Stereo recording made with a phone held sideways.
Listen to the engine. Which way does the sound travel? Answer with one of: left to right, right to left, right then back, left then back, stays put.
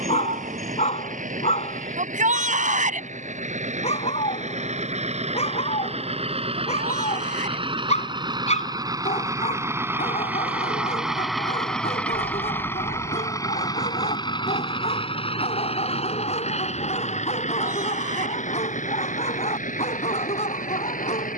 right to left.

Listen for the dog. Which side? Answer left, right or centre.
left.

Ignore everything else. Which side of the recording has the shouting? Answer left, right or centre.
right.